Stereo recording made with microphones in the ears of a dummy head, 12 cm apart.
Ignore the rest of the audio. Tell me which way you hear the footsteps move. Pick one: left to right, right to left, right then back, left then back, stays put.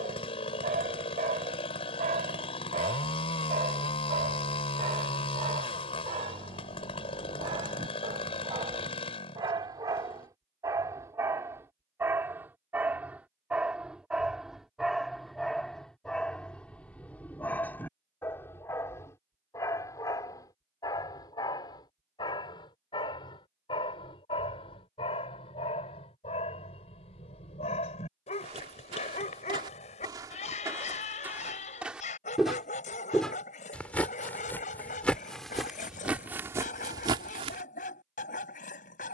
left then back.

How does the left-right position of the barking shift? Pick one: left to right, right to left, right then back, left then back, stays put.
right to left.